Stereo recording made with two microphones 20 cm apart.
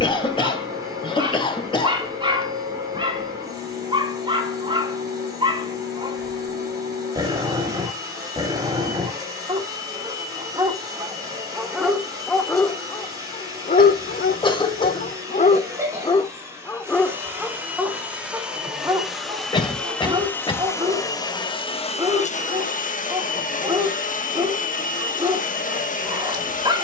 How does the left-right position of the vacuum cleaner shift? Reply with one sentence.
You can hear the vacuum cleaner move to the left.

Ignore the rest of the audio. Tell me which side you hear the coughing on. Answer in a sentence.
You can hear the coughing on the left.